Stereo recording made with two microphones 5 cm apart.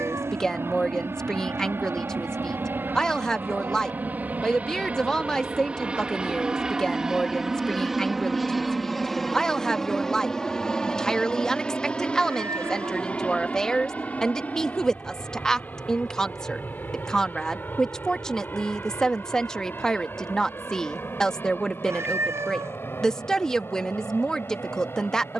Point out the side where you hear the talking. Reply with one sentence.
In this clip you hear the talking in the centre.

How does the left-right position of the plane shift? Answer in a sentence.
In this clip you hear the plane move from right to left.